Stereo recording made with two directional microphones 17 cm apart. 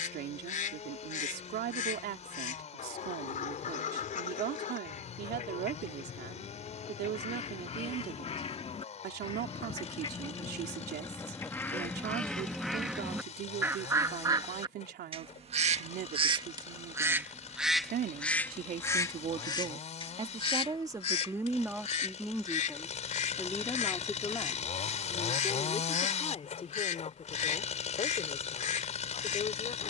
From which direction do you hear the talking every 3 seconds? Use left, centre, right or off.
right, right, right, right, right, right, right, centre, left, left.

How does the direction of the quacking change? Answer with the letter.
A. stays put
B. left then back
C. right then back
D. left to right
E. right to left
C.